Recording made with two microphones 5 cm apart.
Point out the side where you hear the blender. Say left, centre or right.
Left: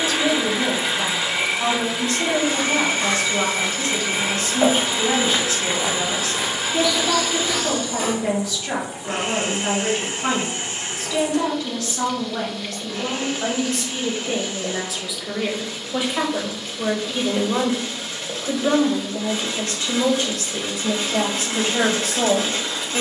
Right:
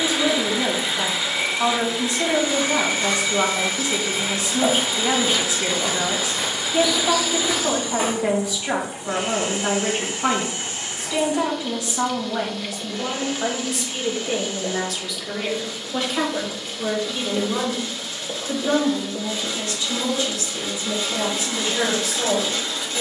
left.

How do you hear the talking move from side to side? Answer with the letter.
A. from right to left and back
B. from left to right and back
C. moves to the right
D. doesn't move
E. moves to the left
E.